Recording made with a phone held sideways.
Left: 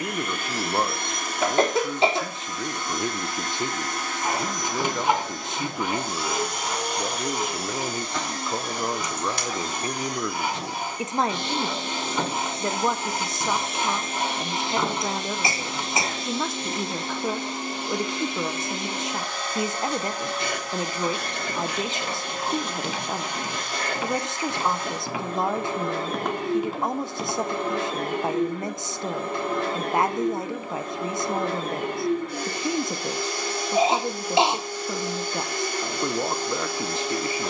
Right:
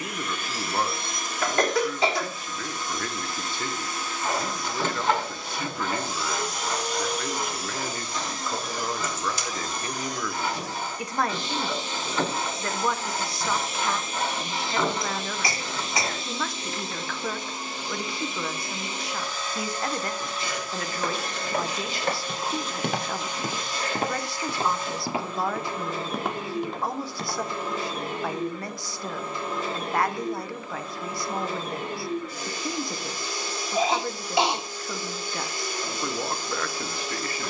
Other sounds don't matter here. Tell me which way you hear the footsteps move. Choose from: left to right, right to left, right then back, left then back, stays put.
right to left.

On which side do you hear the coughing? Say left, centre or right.
left.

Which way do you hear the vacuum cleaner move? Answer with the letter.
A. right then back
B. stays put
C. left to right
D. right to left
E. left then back
B.